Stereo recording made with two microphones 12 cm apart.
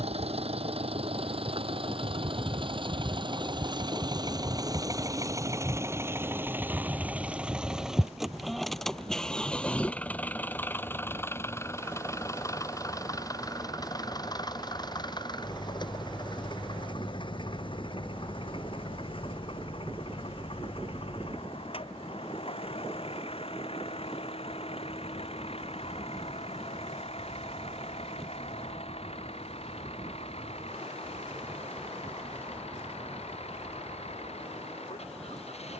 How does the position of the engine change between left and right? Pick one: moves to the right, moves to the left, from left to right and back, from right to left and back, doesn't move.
moves to the left.